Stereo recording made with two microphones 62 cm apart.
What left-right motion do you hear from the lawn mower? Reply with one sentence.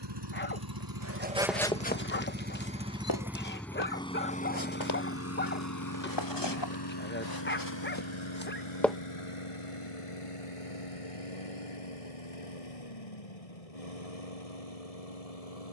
You can hear the lawn mower travel towards the left.